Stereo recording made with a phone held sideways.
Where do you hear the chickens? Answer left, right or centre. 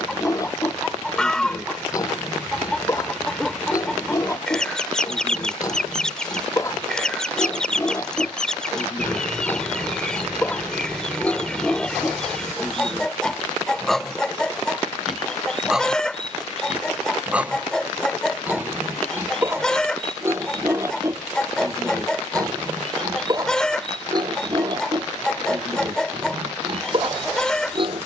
centre.